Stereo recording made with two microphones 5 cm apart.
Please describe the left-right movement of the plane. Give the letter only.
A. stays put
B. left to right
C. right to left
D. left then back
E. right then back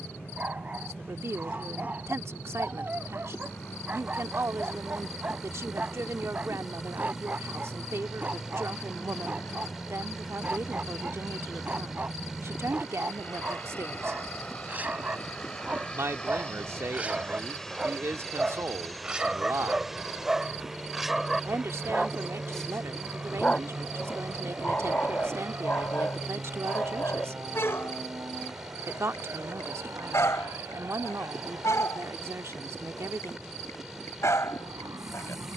B.